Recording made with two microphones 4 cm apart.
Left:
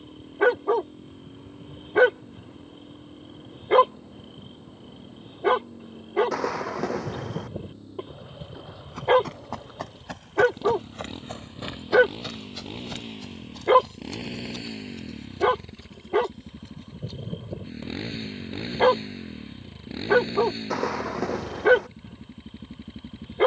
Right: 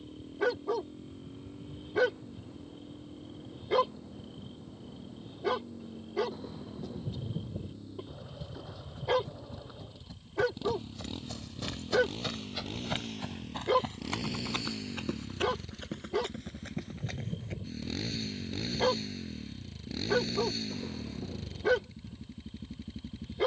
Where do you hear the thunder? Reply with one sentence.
In this clip you hear the thunder on the left.